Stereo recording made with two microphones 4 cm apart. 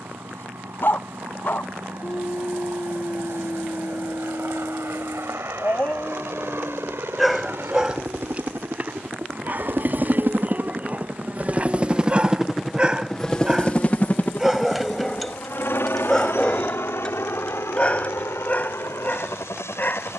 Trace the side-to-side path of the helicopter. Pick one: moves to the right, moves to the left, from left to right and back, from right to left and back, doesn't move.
moves to the left.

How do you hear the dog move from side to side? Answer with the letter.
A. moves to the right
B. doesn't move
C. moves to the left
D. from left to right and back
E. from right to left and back
D.